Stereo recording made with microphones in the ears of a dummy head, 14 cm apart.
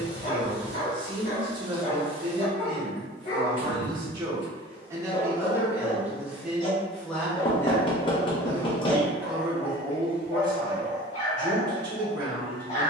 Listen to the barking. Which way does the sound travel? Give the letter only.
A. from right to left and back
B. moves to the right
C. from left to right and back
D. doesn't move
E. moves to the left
D.